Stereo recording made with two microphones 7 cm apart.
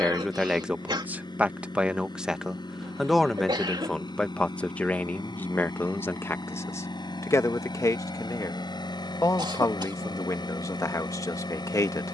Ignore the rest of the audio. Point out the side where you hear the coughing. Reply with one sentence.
In this clip you hear the coughing on the right.